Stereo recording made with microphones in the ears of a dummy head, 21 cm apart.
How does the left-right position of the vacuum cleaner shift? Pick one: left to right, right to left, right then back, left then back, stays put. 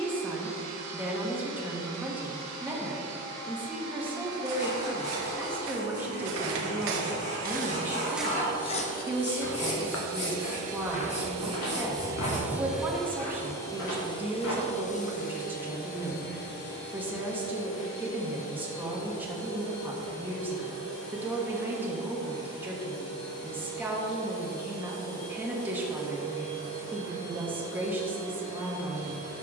right to left.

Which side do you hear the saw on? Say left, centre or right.
left.